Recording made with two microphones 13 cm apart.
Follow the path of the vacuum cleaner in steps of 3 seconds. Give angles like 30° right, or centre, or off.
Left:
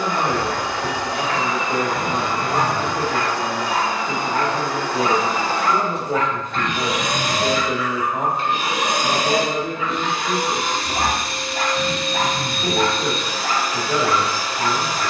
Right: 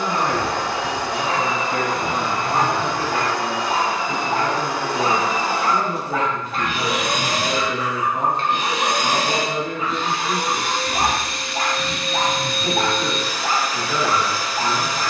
30° right, 20° right, centre, 30° left, 30° left.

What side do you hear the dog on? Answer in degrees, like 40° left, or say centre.
40° right.